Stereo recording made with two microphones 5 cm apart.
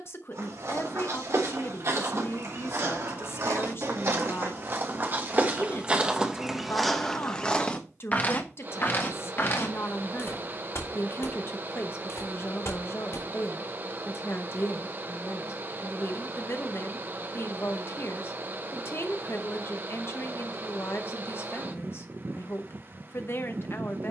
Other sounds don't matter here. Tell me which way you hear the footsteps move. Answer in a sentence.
In this clip you hear the footsteps move to the left.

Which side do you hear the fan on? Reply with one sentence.
You can hear the fan on the right.